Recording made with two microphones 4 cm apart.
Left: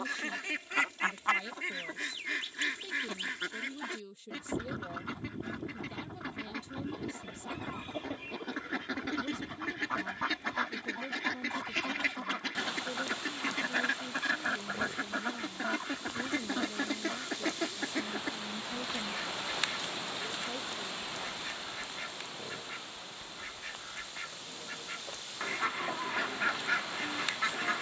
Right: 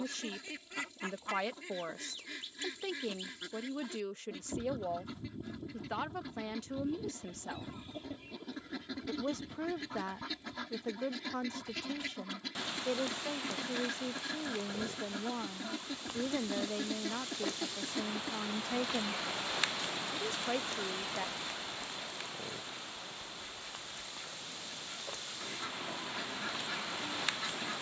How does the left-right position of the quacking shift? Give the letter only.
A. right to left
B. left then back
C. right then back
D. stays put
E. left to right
D.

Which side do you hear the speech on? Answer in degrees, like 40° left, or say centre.
70° right.